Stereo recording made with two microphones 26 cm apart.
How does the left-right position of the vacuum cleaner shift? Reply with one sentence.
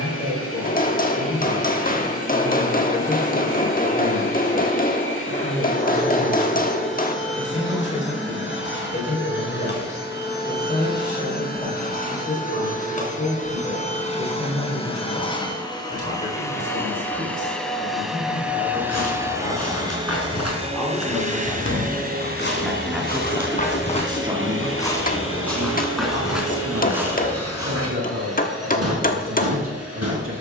In this clip you hear the vacuum cleaner go from the left side to the right.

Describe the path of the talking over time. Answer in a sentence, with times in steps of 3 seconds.
You can hear the talking on the left from 0 s, in the centre from 21 s and on the right from 24 s.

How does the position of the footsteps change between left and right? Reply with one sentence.
In this clip you hear the footsteps travel towards the right.